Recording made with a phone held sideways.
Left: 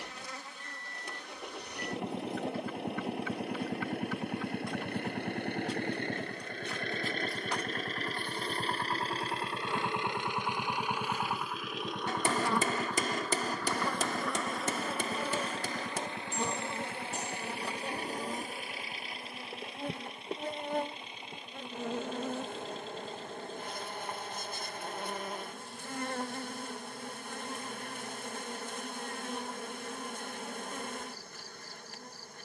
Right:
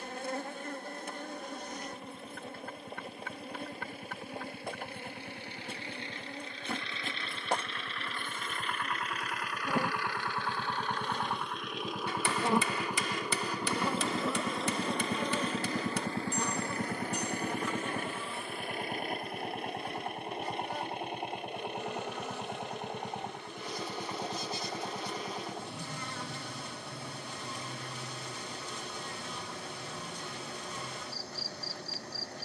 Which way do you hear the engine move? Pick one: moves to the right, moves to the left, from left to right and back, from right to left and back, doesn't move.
moves to the right.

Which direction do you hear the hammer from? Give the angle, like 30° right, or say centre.
40° left.